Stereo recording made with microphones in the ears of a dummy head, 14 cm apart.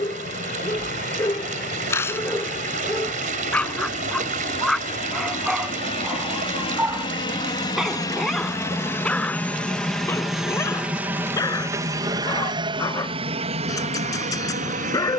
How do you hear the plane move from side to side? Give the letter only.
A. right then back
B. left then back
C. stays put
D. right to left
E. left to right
E.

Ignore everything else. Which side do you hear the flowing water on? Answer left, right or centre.
right.